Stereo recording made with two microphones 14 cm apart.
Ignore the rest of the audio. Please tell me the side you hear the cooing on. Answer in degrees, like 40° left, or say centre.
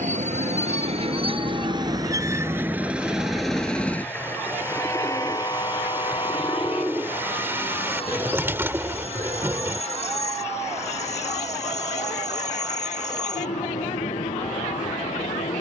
20° right.